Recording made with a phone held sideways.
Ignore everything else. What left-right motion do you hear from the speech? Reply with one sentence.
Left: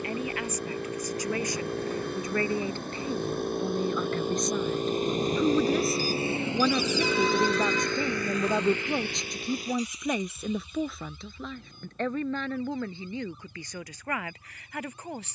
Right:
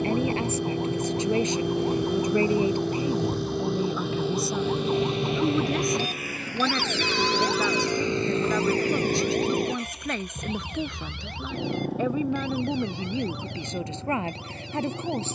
In this clip you hear the speech go left and come back.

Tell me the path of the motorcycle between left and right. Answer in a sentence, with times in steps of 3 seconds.
In this clip you hear the motorcycle on the left from 0 s, in the centre from 6 s and on the right from 9 s.